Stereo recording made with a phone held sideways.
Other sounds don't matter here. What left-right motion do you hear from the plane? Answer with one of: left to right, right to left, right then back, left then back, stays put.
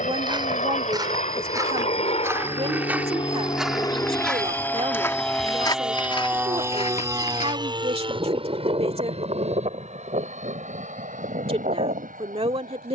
left to right.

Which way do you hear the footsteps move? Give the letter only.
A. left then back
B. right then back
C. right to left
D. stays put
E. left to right
C.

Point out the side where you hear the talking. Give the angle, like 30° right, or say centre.
40° right.